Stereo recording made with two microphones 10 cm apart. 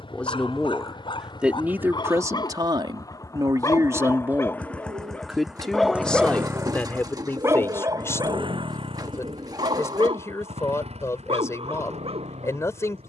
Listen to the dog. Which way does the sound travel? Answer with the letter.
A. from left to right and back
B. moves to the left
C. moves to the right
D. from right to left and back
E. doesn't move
C.